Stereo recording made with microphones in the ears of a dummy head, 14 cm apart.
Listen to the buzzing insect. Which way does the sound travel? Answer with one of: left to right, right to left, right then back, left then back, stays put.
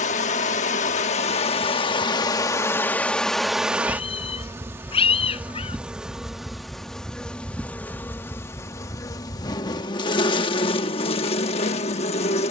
right then back.